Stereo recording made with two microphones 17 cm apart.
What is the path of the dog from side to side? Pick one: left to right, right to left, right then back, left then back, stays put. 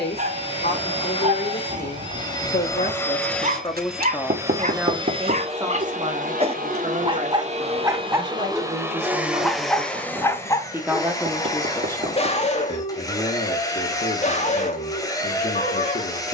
right to left.